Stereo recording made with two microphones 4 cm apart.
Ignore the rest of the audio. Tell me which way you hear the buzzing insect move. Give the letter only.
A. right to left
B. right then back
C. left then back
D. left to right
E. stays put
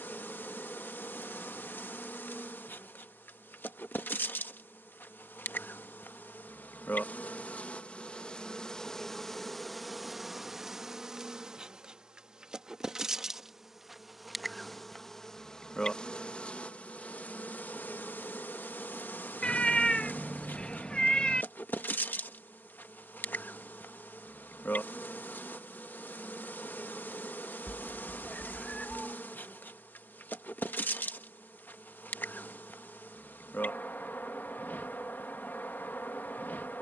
B.